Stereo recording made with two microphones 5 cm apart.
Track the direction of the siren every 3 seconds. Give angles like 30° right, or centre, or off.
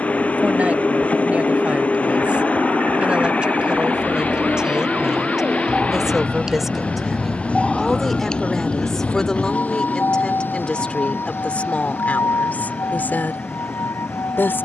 50° right, 30° right, centre, 50° left, 70° left.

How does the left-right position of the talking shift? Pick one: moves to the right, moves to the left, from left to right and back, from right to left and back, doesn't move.
moves to the left.